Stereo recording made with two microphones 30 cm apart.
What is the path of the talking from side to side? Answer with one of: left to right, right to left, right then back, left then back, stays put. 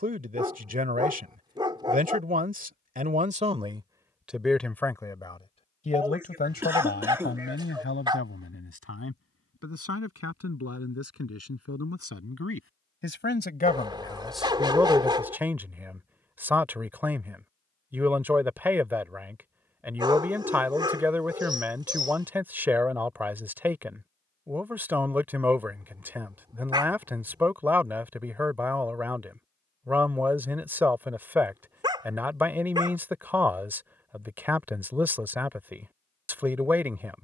left then back.